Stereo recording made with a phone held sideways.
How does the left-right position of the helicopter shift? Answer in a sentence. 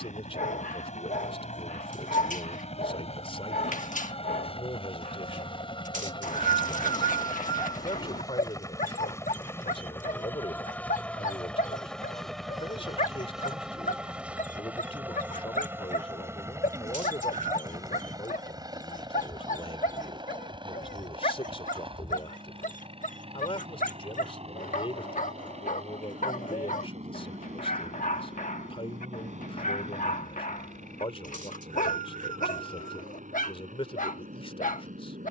You can hear the helicopter go from the left side to the right.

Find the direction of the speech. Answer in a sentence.
You can hear the speech on the left.